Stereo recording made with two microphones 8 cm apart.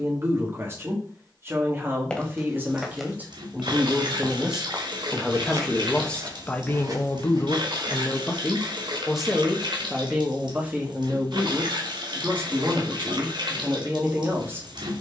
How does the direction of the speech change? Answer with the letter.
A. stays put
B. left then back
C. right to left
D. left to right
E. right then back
B.